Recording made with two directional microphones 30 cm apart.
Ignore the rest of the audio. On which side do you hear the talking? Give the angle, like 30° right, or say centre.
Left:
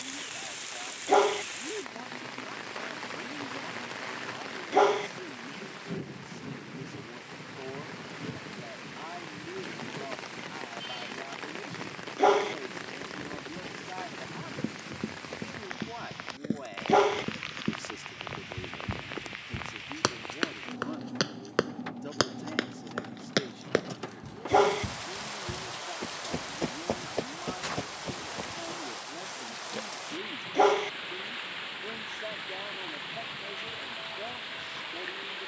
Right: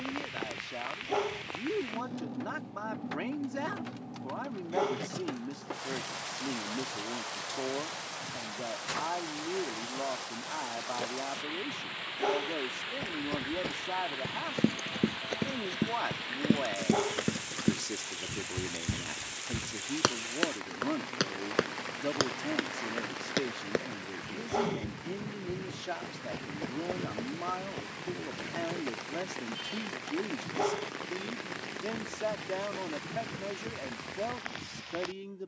50° right.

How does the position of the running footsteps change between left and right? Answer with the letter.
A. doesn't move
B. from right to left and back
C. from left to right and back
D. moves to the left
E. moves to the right
D.